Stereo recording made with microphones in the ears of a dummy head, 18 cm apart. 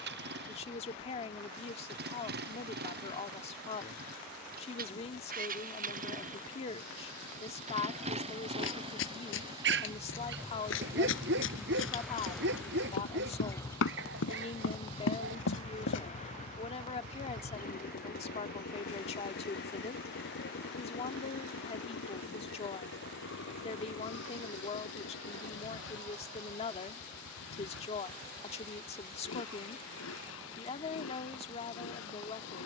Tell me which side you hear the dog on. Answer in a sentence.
You can hear the dog on the right.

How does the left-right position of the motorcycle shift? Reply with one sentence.
You can hear the motorcycle move to the left.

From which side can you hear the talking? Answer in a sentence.
You can hear the talking on the left.